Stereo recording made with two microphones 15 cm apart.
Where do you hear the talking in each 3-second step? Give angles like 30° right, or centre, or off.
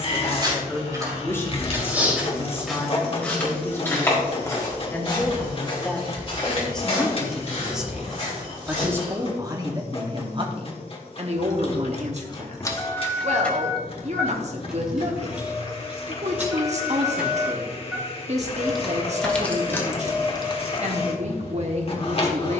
20° left, 10° left, centre, 30° right, 50° right, 50° right, 50° right, 50° right.